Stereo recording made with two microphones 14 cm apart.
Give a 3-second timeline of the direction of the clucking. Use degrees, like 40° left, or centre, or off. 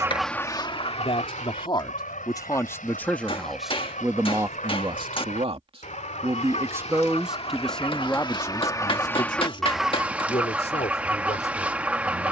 40° left, 60° left, 40° left, 10° right.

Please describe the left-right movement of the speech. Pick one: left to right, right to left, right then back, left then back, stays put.
right then back.